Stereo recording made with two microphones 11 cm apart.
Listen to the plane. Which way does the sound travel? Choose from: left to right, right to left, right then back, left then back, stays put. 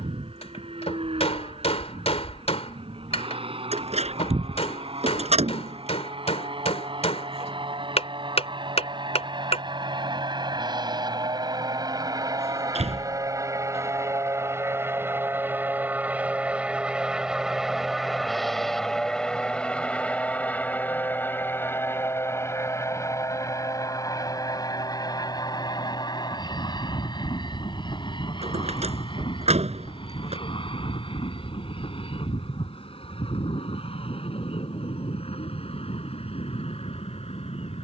right to left.